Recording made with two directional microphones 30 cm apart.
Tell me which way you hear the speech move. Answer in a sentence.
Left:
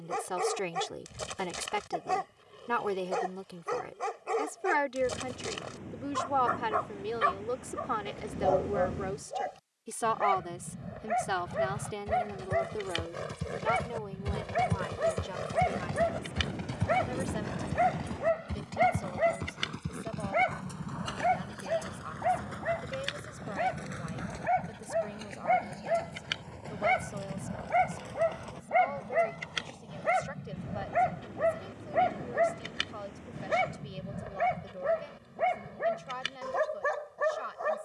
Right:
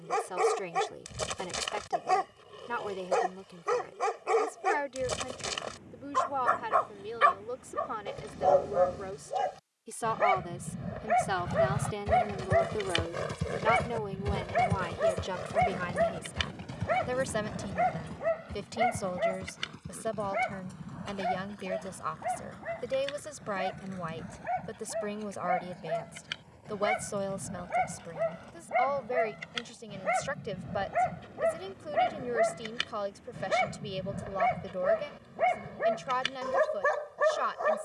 In this clip you hear the speech go from the left side to the right.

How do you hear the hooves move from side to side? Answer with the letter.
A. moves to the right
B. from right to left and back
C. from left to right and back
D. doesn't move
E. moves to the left
E.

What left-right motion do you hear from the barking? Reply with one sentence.
In this clip you hear the barking go left and come back.